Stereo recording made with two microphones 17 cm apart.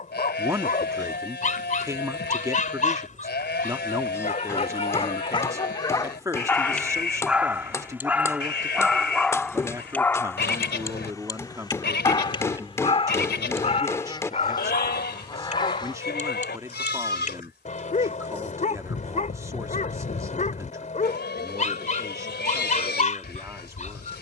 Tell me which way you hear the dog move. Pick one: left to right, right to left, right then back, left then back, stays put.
right then back.